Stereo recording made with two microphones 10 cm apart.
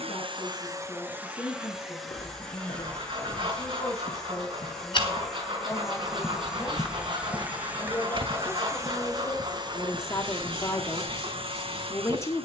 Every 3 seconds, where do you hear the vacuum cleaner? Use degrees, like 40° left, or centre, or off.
20° right, centre, 10° right, 50° right.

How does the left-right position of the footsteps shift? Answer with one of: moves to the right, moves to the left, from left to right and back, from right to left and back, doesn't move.
moves to the right.